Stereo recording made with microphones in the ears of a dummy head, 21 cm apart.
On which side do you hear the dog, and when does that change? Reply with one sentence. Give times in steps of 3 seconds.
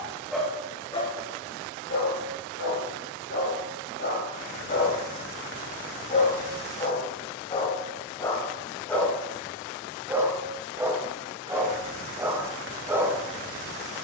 In this clip you hear the dog on the left from 0 s and in the centre from 9 s.